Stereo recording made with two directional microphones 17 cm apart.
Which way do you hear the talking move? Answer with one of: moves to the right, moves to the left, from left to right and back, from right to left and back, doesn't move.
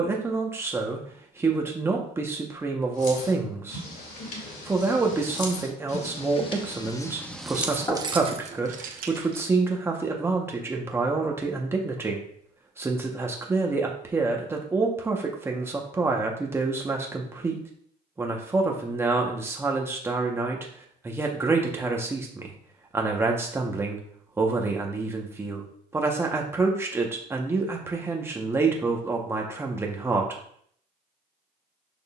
doesn't move.